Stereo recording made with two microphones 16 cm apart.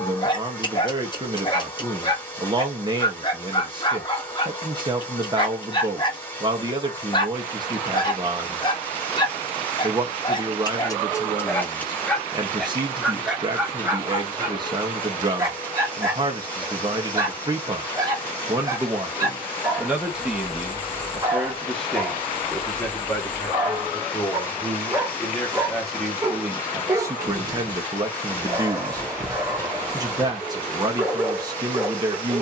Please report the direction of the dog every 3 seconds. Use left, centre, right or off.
left, left, left, left, centre, right, right, right, right, right, right.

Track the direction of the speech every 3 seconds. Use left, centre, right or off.
right, right, right, right, right, right, centre, centre, centre, right, right.